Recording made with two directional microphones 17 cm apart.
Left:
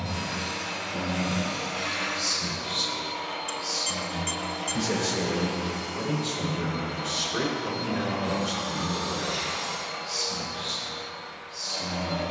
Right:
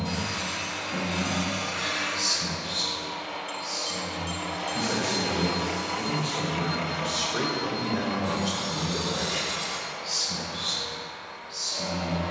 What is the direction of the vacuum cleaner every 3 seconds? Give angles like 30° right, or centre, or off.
40° left, 10° right, 10° right, 40° left.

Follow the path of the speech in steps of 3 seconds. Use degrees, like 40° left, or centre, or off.
40° right, 40° left, centre, 40° right.